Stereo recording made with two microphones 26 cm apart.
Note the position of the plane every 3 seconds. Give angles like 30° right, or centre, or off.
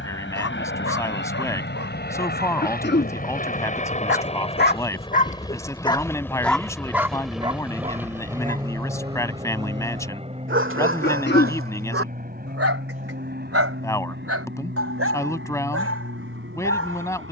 50° left, 20° left, centre, 20° right, 40° right, 50° right.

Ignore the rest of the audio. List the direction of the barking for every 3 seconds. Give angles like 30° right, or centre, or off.
70° left, 40° left, 20° right, 50° right, 60° right, 70° right.